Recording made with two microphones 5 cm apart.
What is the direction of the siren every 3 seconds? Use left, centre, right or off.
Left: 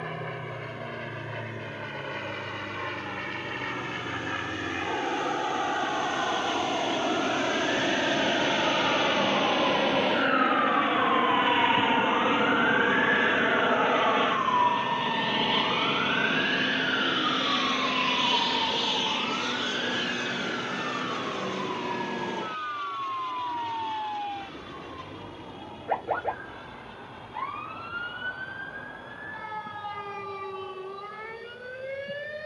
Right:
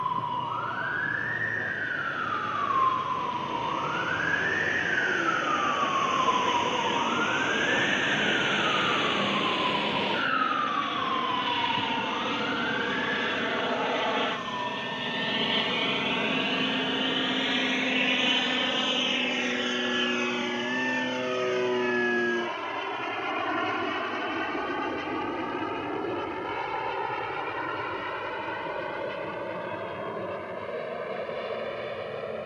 right, right, right, centre, left, left, left, left, left, left, left.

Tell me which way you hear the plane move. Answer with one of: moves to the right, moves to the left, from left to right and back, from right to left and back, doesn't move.
moves to the right.